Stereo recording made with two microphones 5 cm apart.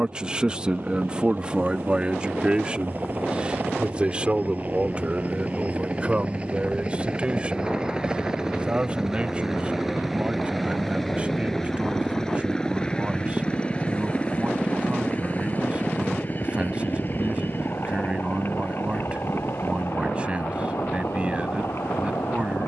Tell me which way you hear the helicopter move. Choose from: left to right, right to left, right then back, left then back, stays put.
right to left.